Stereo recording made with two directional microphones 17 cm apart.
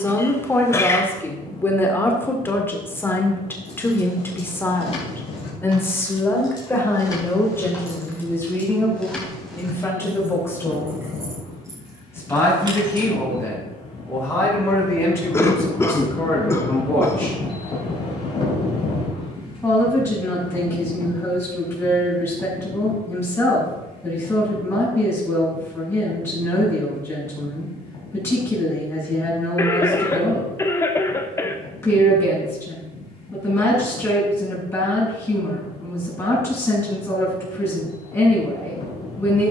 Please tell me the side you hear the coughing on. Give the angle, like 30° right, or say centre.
20° left.